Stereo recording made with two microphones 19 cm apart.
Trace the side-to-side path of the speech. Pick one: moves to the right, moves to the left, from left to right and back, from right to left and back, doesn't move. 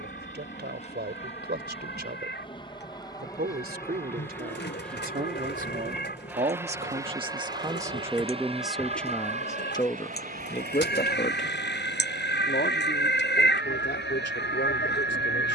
moves to the left.